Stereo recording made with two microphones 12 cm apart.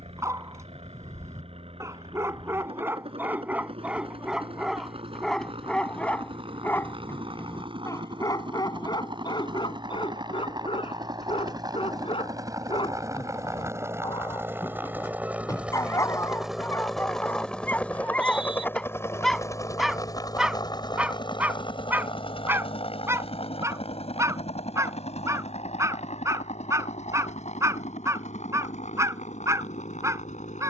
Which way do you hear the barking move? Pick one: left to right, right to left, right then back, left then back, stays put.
left then back.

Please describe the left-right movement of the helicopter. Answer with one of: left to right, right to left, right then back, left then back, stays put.
right to left.